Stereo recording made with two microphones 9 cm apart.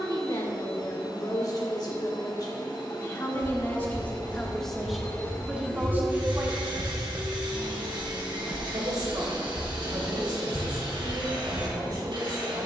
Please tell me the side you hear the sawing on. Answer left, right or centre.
right.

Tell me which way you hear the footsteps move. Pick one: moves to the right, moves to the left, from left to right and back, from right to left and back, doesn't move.
moves to the left.